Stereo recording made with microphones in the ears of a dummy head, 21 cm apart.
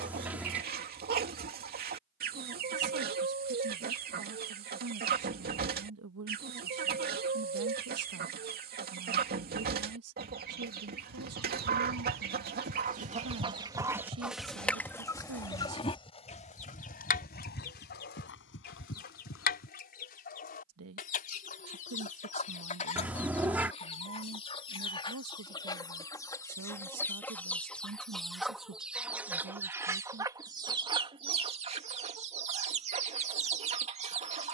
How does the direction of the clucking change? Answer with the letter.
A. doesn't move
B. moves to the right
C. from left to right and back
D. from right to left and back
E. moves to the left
D.